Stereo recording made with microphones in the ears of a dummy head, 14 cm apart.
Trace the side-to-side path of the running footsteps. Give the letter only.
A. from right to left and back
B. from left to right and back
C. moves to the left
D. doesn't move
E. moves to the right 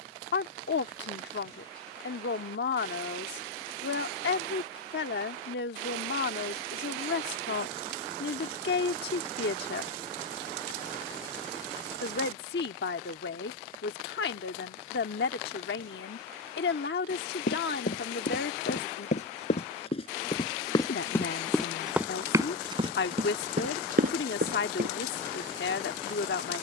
E.